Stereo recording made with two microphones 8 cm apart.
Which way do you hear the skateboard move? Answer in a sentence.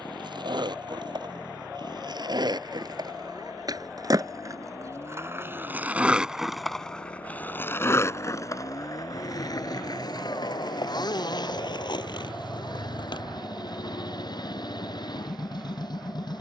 In this clip you hear the skateboard move to the left.